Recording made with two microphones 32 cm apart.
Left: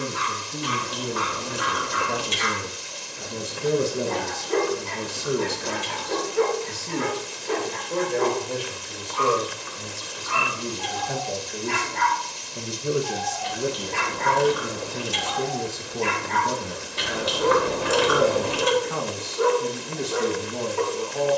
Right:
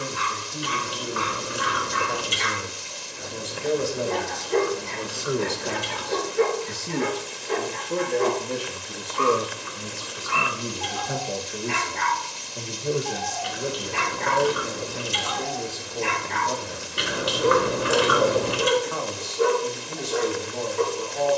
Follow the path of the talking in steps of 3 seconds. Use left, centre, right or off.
left, left, right, centre, left, left, left.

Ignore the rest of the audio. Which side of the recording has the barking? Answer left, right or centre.
left.